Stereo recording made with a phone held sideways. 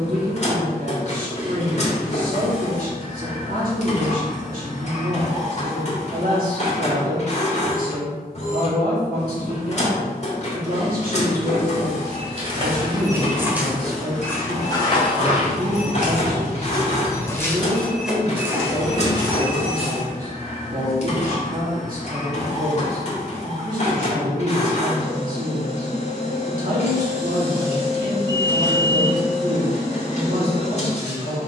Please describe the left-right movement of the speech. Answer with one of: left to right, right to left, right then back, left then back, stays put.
stays put.